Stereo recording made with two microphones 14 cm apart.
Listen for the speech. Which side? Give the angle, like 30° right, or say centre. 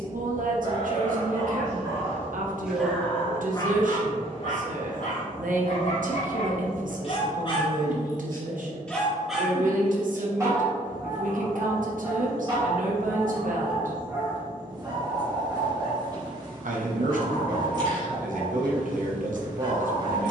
70° right.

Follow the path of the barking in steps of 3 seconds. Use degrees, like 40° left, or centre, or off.
20° right, 50° left, 40° left, 20° right, 30° right, 30° right, 30° right.